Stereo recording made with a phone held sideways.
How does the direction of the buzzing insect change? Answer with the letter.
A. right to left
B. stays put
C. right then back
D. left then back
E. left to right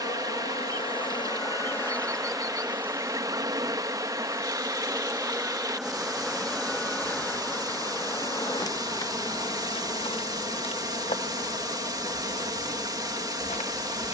C.